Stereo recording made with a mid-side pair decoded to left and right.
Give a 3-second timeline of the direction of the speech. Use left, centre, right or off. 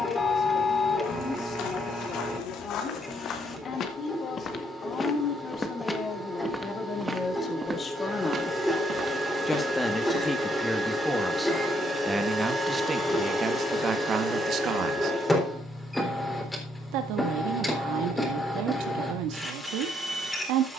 left, left, left, centre, right, right, right.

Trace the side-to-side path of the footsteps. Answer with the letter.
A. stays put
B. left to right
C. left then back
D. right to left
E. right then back
B.